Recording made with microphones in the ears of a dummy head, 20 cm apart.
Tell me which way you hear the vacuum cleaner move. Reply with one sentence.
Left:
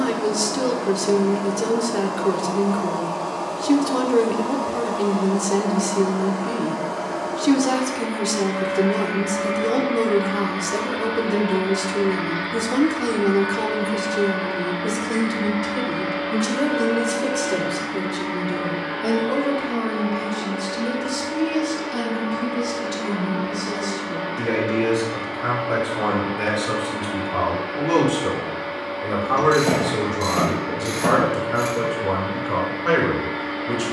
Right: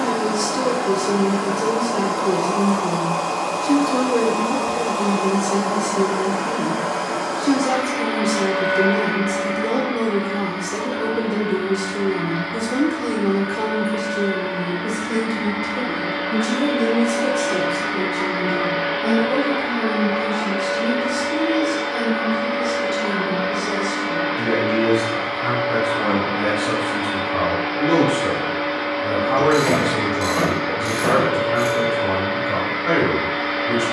You can hear the vacuum cleaner move from right to left and back again.